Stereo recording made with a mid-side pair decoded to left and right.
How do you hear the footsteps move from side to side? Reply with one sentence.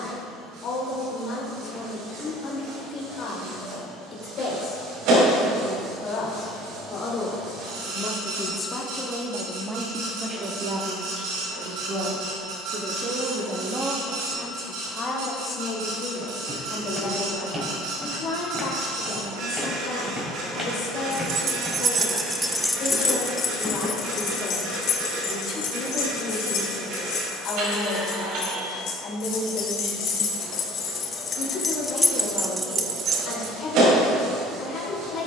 You can hear the footsteps move to the left.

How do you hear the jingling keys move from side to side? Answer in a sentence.
In this clip you hear the jingling keys go left and come back.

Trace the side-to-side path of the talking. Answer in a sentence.
In this clip you hear the talking move from left to right and back again.